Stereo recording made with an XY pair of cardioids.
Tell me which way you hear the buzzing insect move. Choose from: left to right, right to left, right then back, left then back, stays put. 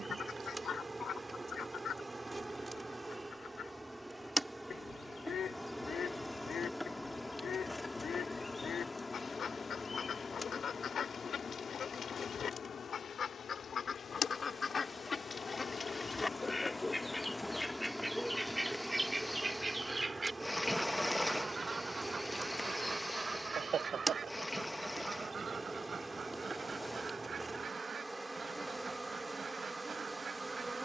left then back.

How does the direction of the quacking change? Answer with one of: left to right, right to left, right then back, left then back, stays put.
left to right.